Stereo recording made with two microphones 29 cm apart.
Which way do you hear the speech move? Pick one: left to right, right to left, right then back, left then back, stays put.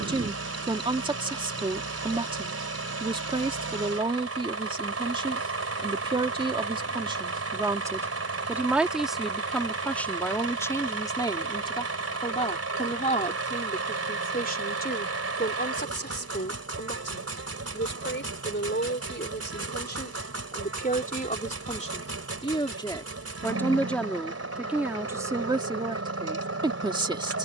left then back.